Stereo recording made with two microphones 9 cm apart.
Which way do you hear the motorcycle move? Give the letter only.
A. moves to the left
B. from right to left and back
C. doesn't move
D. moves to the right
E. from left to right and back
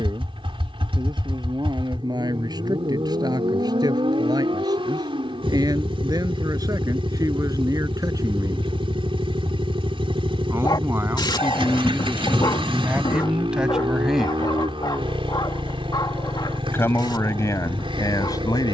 C.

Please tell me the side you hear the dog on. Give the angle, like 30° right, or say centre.
50° left.